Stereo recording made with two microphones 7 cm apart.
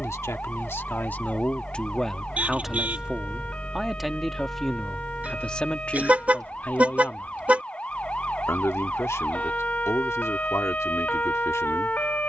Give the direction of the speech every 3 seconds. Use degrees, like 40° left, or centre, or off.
20° left, centre, 30° left, 40° left.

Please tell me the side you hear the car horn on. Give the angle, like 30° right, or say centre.
20° right.